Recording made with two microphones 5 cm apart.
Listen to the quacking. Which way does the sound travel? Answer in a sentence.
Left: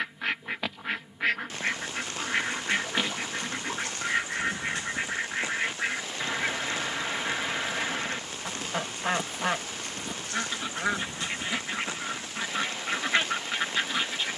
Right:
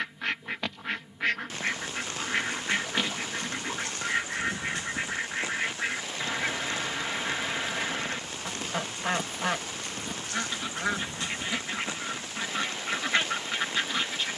In this clip you hear the quacking stay in one place.